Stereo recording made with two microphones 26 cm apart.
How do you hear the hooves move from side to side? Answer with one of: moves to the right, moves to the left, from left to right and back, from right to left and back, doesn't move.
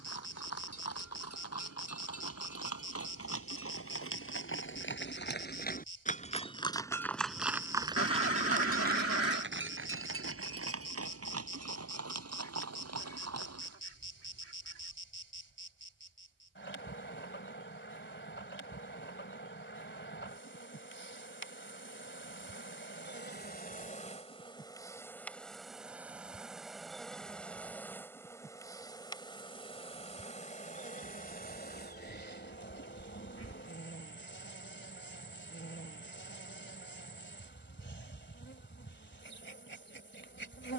moves to the right.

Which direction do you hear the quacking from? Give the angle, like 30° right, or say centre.
60° left.